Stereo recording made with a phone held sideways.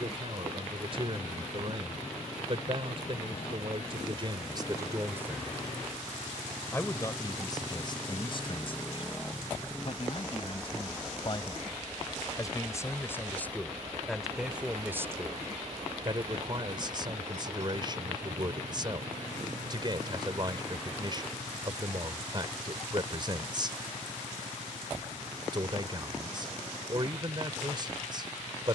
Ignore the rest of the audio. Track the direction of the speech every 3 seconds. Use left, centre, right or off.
right, right, left, left, centre, right, right, right, right, right.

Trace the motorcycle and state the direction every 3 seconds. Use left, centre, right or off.
left, left, left, centre, right, right, right, right, right, right.